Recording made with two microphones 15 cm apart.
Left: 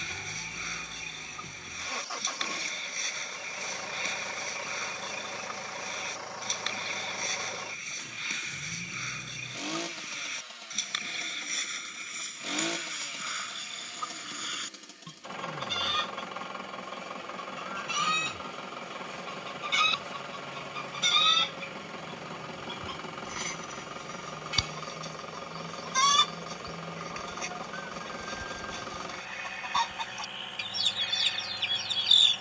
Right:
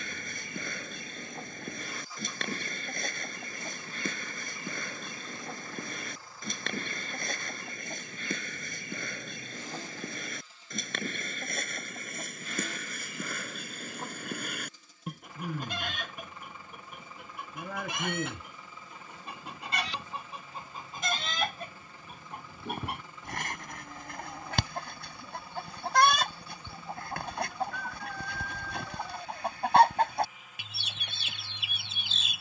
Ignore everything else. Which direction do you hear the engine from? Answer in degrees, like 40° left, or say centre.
80° left.